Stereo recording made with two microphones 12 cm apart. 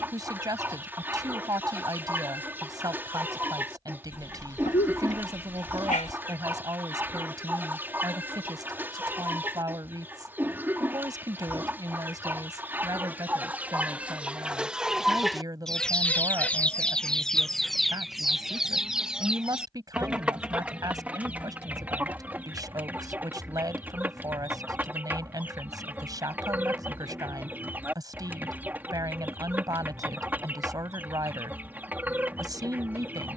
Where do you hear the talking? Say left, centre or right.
right.